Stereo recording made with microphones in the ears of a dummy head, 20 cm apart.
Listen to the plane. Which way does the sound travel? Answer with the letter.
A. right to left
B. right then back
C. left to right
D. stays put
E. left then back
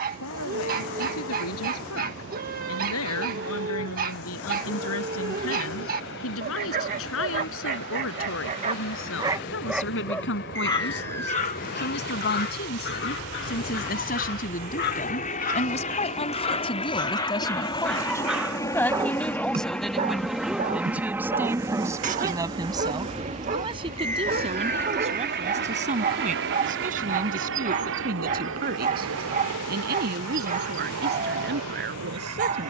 C.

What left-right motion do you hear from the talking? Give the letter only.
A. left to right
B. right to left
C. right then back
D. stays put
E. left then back
A.